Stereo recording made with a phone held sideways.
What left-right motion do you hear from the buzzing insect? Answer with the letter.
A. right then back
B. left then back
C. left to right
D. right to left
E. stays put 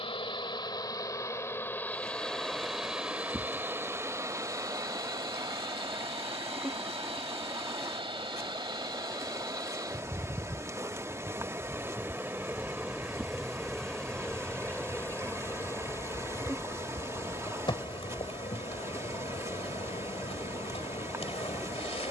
A.